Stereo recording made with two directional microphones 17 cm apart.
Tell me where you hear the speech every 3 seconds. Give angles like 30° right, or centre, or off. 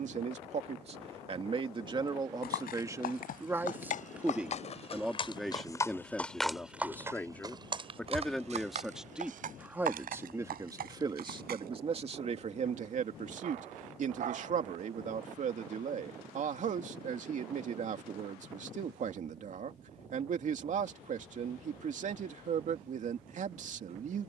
30° right, 10° right, 10° left, 20° right, 50° right, 50° right, 50° right, 50° right.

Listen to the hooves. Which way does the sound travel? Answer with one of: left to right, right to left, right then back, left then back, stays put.
left to right.